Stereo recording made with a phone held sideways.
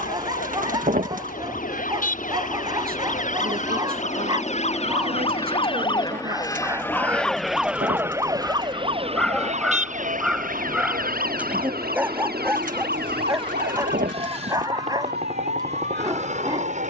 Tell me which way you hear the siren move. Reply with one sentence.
In this clip you hear the siren go from the left side to the right.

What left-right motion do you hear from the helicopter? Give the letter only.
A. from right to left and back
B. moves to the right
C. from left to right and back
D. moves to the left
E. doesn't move
B.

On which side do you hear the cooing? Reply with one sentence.
You can hear the cooing on the right.